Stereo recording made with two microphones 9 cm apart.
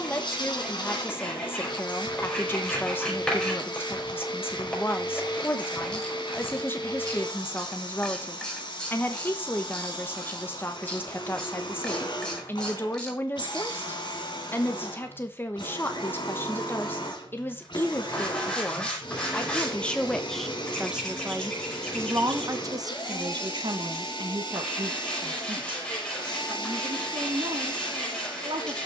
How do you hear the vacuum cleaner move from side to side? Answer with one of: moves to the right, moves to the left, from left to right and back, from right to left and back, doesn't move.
doesn't move.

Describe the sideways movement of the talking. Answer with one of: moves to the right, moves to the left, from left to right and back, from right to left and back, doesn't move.
moves to the right.